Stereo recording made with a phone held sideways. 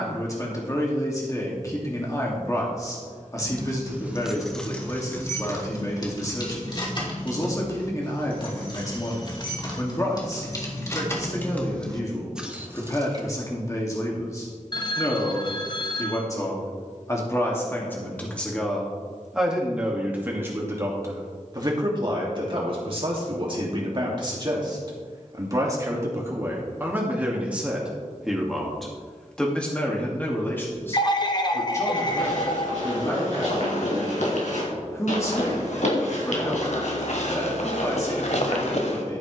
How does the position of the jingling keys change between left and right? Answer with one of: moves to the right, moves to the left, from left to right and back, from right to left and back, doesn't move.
from right to left and back.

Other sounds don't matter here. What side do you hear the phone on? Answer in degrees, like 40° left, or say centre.
30° left.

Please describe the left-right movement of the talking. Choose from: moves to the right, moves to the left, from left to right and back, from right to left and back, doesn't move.
from left to right and back.